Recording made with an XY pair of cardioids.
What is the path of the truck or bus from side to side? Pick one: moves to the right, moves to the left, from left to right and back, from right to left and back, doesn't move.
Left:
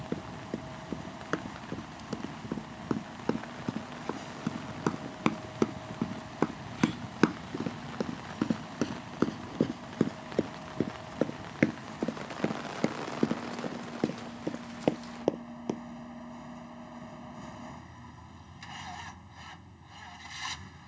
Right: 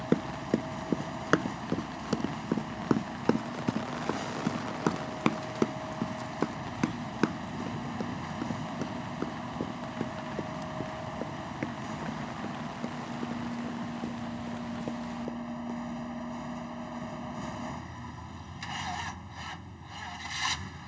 doesn't move.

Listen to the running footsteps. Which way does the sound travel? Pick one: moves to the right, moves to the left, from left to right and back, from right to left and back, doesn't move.
moves to the left.